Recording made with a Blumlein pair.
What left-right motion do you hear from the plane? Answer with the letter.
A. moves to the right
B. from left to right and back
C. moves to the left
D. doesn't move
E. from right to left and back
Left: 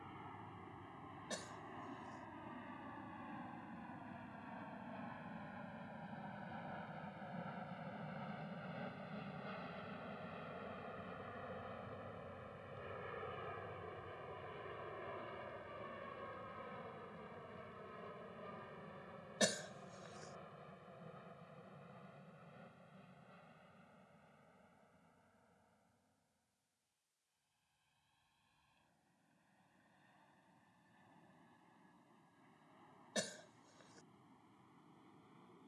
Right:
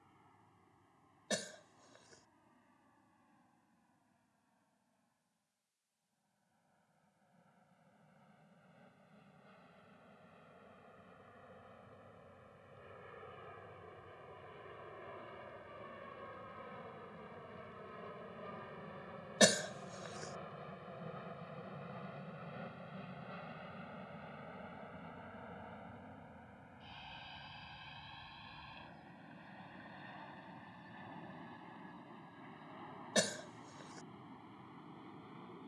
A.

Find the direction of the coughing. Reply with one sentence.
In this clip you hear the coughing on the right.